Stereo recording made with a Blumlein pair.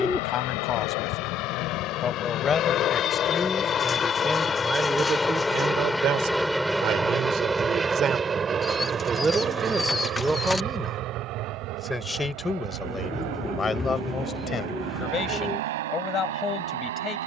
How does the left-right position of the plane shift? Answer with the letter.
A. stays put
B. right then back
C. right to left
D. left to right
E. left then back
D.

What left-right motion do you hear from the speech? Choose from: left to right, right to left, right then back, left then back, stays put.
right then back.